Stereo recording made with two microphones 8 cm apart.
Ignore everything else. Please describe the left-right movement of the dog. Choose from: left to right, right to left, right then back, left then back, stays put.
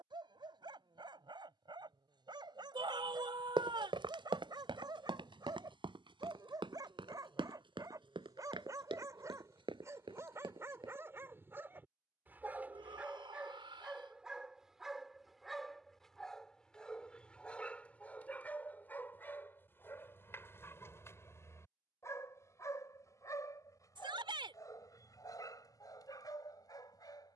right to left.